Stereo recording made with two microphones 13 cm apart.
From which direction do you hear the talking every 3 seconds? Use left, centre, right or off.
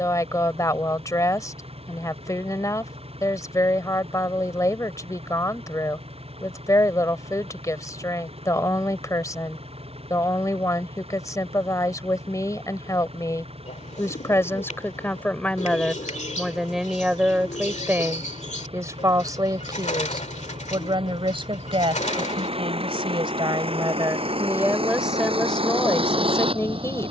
left, left, left, left, left, centre, right, right, centre.